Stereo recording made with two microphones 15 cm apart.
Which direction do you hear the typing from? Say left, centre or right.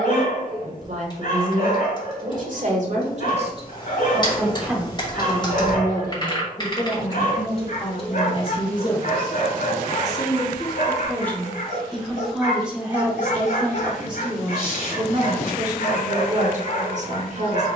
left.